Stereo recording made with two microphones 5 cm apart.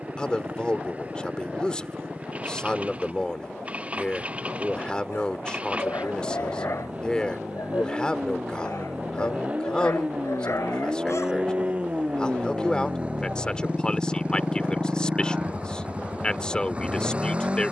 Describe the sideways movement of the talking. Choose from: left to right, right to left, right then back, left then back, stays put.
stays put.